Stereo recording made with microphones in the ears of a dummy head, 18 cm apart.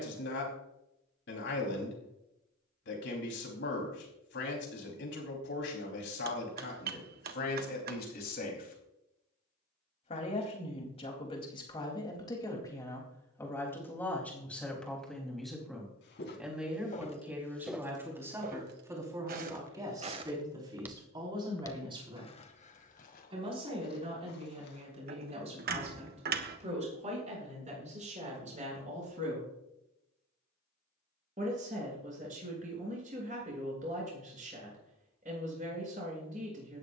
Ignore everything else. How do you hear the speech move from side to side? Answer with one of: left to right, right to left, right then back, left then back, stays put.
left to right.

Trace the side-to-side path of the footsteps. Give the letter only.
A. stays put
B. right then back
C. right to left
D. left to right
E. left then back
B.